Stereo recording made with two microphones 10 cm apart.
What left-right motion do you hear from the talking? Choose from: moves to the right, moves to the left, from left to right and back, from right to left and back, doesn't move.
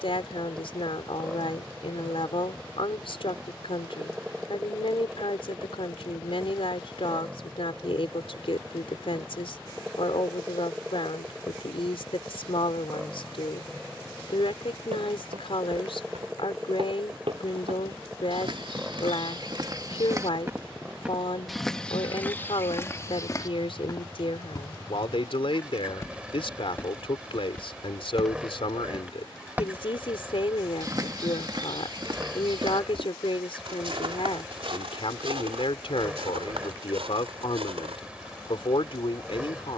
doesn't move.